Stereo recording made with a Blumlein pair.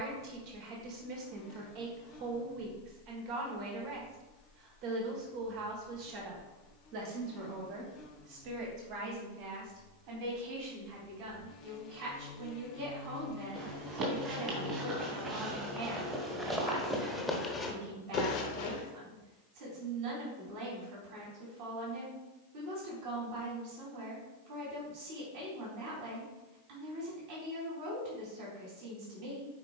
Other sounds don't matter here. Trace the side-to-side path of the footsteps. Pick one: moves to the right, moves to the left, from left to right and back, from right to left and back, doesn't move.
moves to the left.